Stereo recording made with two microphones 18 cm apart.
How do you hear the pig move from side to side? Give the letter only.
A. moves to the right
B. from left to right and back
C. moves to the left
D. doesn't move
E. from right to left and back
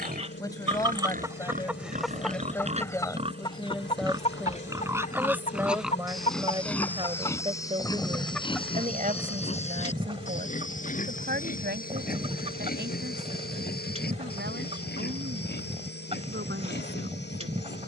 C.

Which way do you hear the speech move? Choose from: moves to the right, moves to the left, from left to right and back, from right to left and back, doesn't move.
moves to the right.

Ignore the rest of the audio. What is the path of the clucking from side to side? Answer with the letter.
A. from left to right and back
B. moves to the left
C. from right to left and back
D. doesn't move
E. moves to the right
C.